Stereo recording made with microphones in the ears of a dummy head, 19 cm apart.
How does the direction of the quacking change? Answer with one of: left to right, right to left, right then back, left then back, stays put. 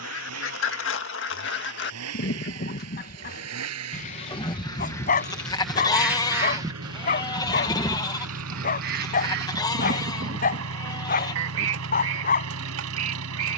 left to right.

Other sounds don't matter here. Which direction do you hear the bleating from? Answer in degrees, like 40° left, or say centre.
20° left.